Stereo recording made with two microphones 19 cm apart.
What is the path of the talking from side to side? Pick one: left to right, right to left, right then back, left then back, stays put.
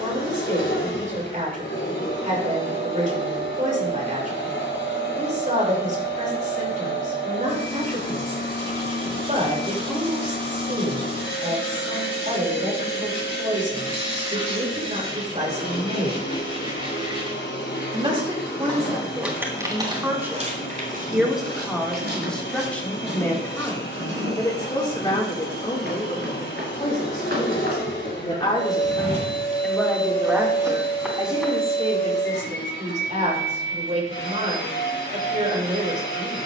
left then back.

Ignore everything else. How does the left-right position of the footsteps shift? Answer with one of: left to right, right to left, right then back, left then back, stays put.
right then back.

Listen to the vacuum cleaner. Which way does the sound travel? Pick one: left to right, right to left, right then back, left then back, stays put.
stays put.